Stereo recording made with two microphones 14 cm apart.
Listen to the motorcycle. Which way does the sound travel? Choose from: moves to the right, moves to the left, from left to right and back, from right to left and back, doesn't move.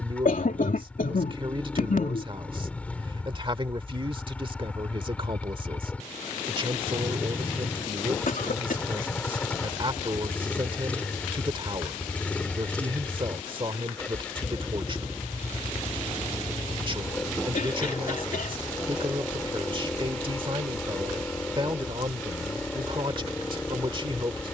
doesn't move.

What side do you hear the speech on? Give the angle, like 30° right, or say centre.
40° right.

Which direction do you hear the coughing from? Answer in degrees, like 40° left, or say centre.
70° left.